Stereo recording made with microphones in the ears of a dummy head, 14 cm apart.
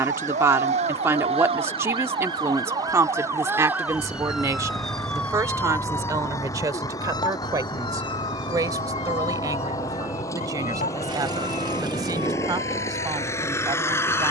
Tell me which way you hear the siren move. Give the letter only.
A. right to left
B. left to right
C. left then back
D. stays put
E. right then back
A.